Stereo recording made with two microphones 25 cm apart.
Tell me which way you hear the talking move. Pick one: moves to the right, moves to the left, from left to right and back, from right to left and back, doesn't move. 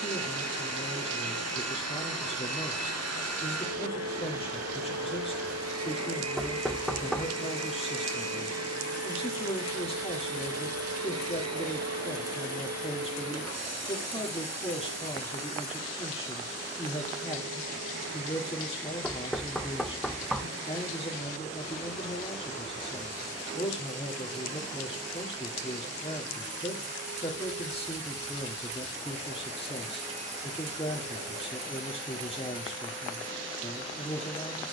doesn't move.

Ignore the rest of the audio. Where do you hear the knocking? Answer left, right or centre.
centre.